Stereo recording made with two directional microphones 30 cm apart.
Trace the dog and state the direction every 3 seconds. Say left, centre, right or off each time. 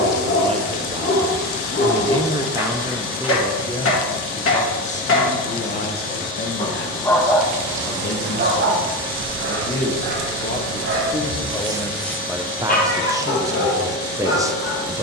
left, left, centre, right, left.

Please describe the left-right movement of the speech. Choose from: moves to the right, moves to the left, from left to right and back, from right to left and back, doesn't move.
from right to left and back.